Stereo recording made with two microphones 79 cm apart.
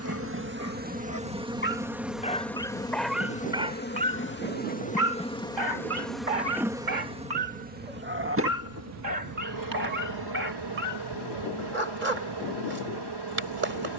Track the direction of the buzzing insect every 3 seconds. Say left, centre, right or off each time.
centre, centre, centre, right, right.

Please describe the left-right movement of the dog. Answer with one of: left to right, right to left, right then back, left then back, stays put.
left to right.